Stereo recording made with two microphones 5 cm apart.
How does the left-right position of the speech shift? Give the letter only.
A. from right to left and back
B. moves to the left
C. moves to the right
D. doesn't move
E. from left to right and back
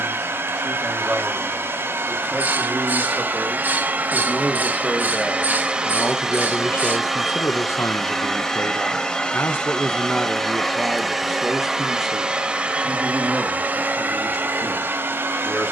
A.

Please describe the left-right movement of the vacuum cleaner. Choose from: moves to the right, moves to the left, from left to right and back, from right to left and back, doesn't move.
from right to left and back.